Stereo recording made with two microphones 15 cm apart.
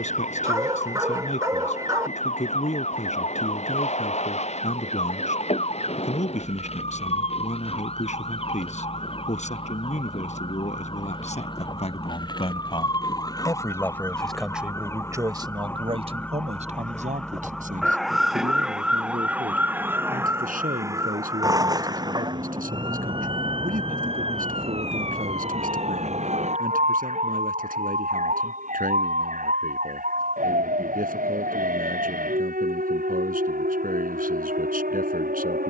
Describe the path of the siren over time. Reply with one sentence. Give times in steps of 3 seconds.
You can hear the siren on the left from 0 s, in the centre from 15 s and on the right from 21 s.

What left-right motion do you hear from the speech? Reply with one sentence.
In this clip you hear the speech move from left to right.